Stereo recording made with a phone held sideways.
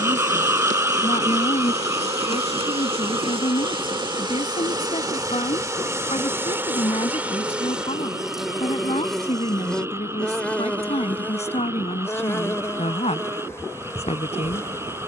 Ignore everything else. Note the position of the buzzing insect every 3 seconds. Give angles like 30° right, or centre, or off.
50° right, 30° right, 10° right, 10° left, 20° left.